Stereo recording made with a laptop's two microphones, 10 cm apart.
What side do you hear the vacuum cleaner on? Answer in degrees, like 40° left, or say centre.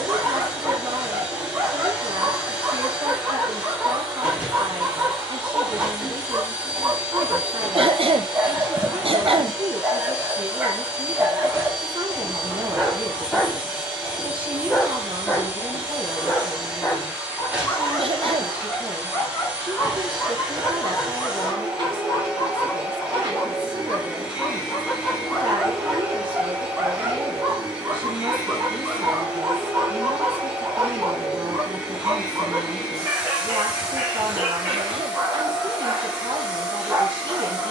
20° right.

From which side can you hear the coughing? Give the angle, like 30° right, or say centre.
70° right.